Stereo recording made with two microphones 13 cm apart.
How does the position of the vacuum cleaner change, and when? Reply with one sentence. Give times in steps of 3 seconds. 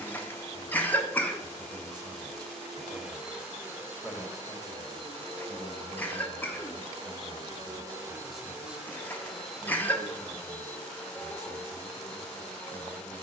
You can hear the vacuum cleaner in the centre from 0 s, on the right from 3 s and in the centre from 9 s.